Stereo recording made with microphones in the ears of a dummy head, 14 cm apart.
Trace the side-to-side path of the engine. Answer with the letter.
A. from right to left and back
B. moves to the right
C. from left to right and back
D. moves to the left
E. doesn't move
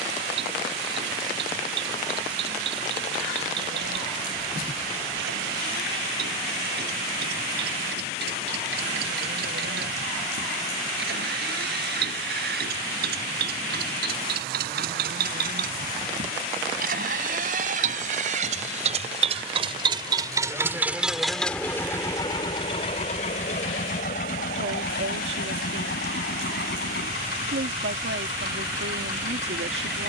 D.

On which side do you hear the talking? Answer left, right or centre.
right.